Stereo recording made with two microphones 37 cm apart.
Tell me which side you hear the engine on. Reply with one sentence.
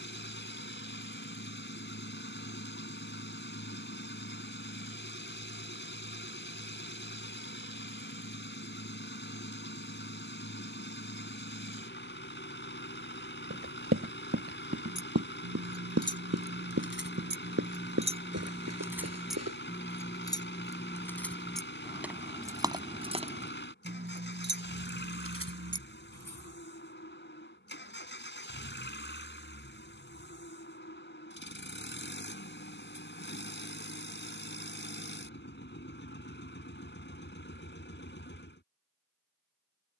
You can hear the engine on the left.